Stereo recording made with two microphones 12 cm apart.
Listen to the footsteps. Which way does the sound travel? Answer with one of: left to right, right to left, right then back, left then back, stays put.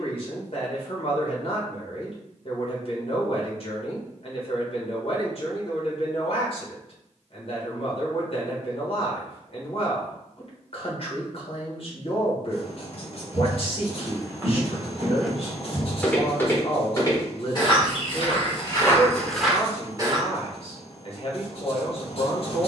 left then back.